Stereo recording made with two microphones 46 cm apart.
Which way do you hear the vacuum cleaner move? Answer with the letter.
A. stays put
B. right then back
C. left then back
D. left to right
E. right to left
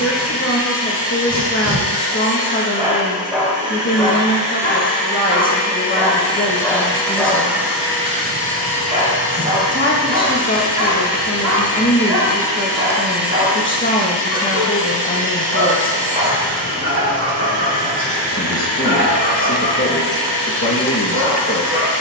C.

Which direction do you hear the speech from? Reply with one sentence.
In this clip you hear the speech on the left.